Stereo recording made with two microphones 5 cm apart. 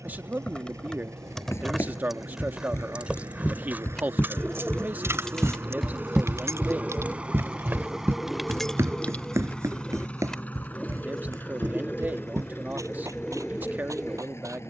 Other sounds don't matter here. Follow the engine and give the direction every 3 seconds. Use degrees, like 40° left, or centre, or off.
70° right, 50° right, 10° right, 30° left, 50° left.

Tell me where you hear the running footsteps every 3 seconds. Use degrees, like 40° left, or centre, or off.
50° left, 30° left, 40° right, 70° right, 80° right.